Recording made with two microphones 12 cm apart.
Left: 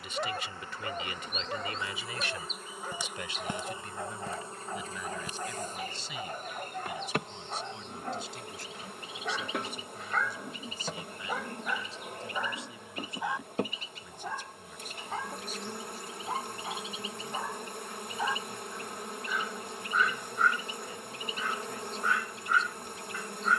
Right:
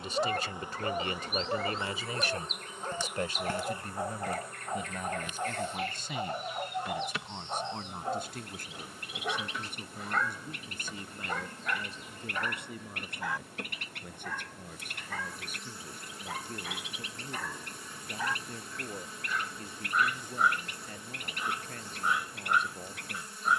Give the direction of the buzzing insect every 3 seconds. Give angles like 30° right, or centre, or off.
10° right, 30° left, 50° left, 60° left, 60° left, 60° left, 60° left, 60° left.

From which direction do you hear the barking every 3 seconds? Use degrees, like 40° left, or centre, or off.
20° right, 20° right, 20° right, centre, 20° left, 30° left, centre, 20° right.